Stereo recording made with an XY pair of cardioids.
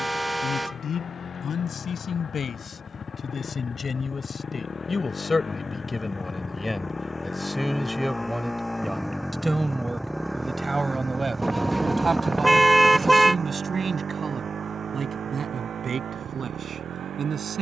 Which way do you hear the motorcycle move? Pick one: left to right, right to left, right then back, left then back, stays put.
left to right.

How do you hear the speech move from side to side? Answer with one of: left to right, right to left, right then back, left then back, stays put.
left to right.